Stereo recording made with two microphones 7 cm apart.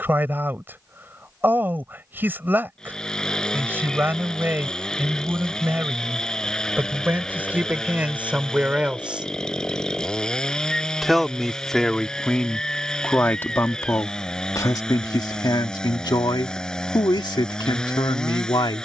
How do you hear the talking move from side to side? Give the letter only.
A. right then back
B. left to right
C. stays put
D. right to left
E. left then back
D.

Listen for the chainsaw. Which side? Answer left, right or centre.
centre.